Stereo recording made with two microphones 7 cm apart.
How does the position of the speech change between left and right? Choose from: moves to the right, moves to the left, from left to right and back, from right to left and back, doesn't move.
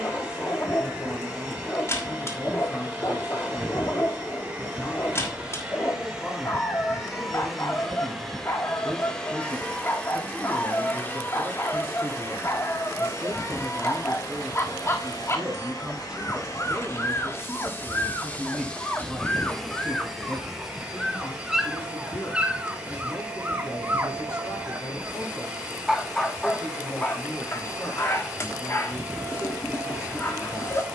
from left to right and back.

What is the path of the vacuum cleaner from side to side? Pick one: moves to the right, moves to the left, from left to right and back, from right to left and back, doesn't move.
from right to left and back.